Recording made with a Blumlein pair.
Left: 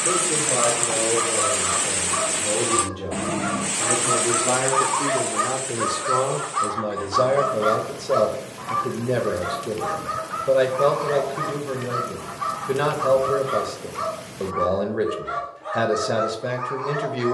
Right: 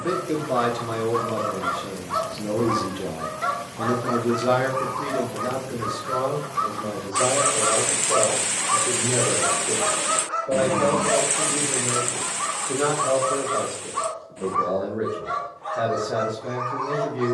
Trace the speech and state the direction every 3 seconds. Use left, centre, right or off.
right, centre, left, left, left, left.